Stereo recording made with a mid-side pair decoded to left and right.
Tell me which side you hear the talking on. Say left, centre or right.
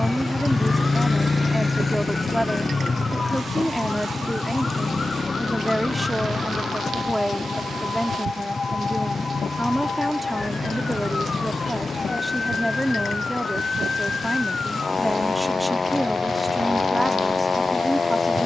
centre.